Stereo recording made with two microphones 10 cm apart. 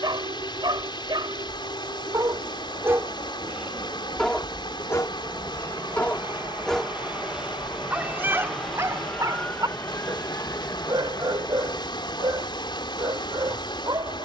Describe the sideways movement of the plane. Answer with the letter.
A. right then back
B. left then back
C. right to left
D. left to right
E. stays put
C.